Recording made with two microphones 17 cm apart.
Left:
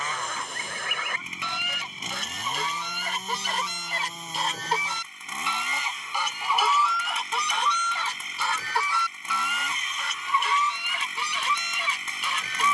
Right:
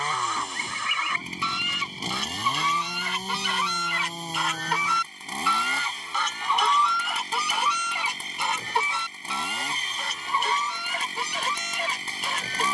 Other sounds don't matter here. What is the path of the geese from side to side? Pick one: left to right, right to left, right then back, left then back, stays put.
left to right.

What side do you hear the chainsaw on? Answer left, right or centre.
right.